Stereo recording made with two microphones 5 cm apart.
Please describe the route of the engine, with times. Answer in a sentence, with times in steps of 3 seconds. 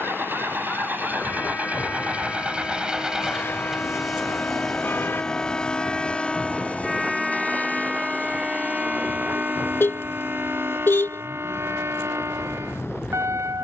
In this clip you hear the engine on the right from 0 s, in the centre from 3 s and on the left from 6 s.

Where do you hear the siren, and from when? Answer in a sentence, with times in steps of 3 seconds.
You can hear the siren on the left from 0 s, in the centre from 6 s and on the right from 9 s.